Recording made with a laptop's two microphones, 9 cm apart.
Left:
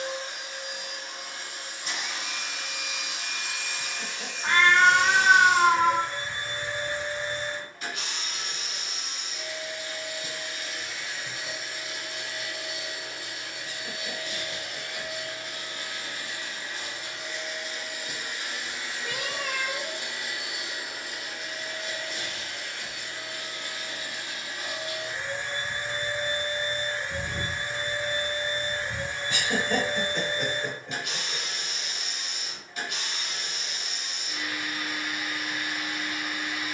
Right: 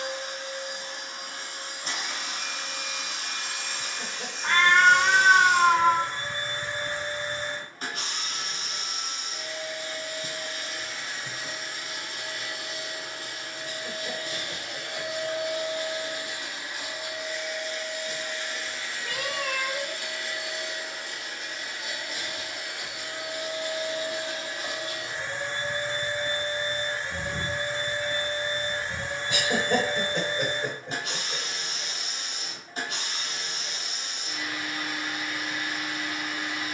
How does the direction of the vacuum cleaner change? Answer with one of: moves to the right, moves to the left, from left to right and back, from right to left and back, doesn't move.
from right to left and back.